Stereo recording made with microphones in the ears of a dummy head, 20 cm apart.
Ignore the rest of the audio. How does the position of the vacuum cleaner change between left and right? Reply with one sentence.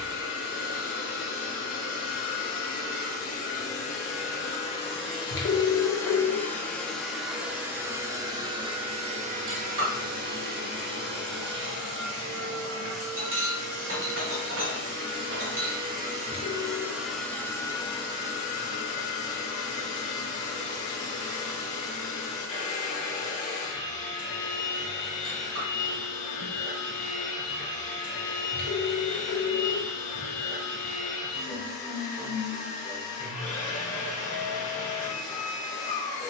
In this clip you hear the vacuum cleaner move from left to right and back again.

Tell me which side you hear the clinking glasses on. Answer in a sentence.
In this clip you hear the clinking glasses on the right.